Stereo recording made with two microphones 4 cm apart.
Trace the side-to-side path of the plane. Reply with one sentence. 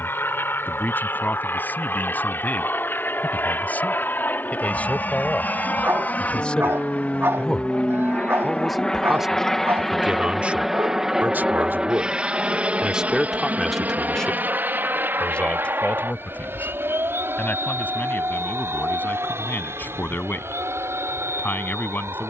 In this clip you hear the plane go from the left side to the right.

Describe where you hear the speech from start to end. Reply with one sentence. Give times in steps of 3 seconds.
In this clip you hear the speech on the left from 0 s, in the centre from 6 s, on the right from 9 s, in the centre from 12 s and on the left from 15 s.